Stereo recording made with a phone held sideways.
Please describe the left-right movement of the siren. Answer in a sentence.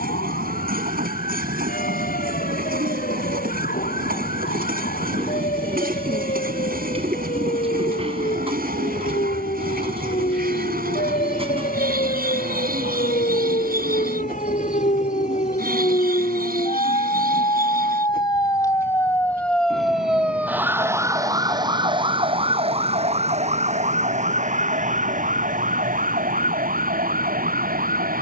In this clip you hear the siren go from the left side to the right.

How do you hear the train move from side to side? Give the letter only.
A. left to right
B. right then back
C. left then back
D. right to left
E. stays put
E.